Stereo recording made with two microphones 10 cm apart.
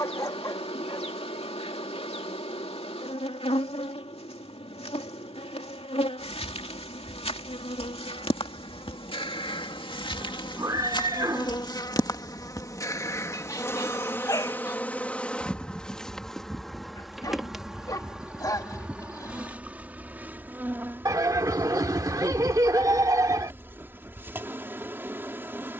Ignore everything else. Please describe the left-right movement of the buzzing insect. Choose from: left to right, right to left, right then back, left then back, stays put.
left to right.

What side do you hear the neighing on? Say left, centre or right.
right.